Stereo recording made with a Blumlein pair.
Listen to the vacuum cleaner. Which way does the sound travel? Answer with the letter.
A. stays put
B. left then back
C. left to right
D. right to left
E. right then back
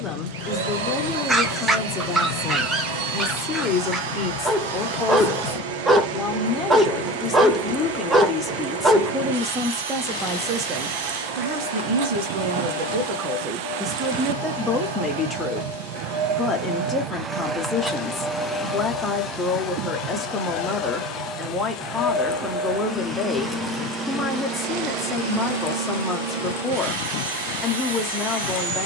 B.